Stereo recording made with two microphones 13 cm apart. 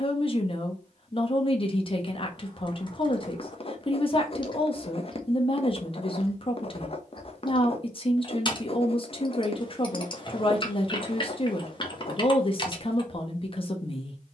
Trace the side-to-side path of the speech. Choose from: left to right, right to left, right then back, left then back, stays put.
stays put.